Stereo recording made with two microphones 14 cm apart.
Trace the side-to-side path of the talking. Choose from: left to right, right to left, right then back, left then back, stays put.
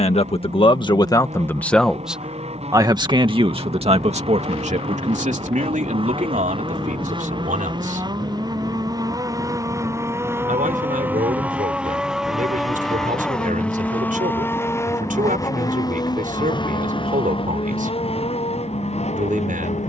left to right.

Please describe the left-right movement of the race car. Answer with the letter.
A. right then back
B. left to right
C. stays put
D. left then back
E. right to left
E.